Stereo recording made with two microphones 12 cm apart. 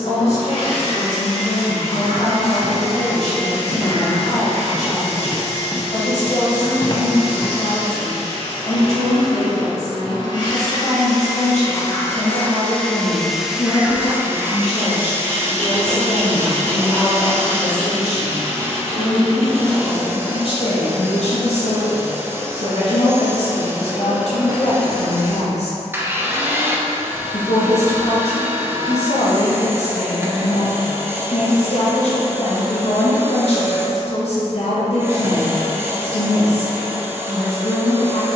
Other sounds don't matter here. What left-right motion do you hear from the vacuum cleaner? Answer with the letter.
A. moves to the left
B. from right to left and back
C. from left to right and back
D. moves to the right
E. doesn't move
D.